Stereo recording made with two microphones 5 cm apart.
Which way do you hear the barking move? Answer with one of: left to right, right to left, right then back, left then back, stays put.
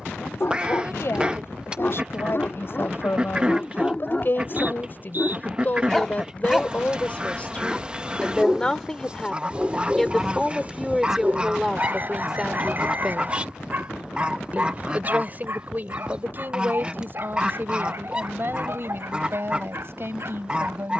left to right.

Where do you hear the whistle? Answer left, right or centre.
right.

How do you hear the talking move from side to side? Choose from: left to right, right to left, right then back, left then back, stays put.
left to right.